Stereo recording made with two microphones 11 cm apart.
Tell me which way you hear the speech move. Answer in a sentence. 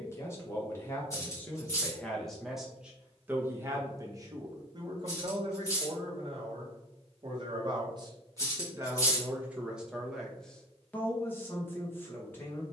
You can hear the speech move from left to right and back again.